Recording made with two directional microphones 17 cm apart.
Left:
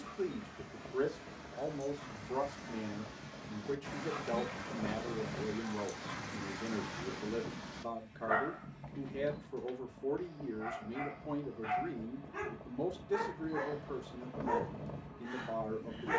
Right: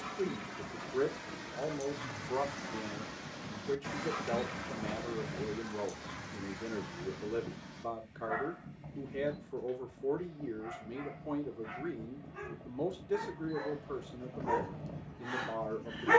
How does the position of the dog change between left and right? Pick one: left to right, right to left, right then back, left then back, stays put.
left then back.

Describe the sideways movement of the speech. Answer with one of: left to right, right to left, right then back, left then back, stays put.
stays put.